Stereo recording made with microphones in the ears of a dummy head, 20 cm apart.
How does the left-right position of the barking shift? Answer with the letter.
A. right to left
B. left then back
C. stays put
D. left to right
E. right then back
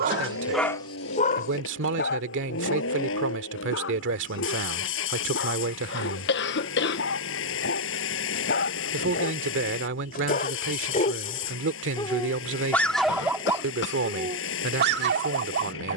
B.